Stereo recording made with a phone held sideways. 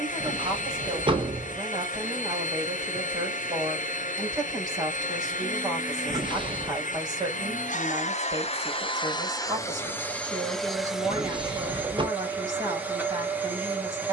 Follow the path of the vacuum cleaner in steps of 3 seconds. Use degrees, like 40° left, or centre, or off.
70° left, 70° left, 60° left, 10° left, 10° right.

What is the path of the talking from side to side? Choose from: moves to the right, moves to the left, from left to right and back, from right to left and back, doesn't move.
doesn't move.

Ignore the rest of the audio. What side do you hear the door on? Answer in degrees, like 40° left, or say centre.
40° right.